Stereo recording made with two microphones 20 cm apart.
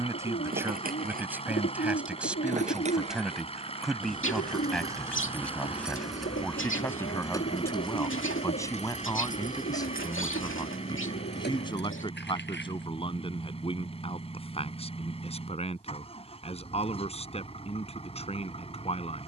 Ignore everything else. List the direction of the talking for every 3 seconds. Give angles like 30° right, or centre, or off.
10° right, centre, 10° left, 20° left, 30° left, 30° left, 30° left.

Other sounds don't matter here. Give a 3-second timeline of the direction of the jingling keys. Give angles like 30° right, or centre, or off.
40° right, 20° right, 20° left, 50° left, 60° left, off, off.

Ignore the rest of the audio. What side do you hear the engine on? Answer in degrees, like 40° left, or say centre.
30° left.